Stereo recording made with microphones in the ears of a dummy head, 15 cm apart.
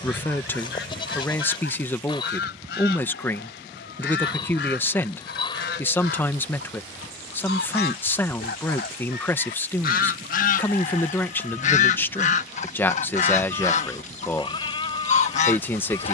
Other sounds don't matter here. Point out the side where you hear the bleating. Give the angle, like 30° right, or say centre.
30° left.